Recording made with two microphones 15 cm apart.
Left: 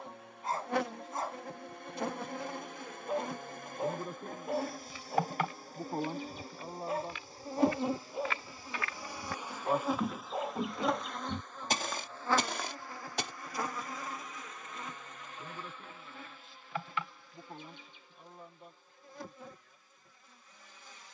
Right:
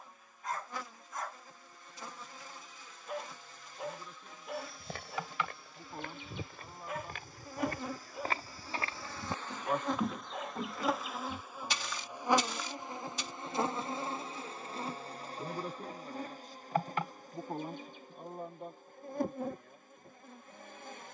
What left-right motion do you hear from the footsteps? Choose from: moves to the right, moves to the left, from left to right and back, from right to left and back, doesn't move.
moves to the left.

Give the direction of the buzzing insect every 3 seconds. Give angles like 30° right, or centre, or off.
70° left, 50° left, 30° left, centre, 20° right, 40° right, 50° right.